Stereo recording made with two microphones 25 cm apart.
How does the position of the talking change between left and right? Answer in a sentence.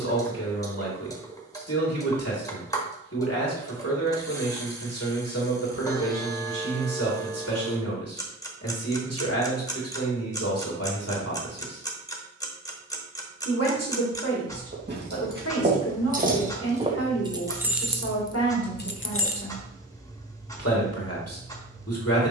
You can hear the talking stay in one place.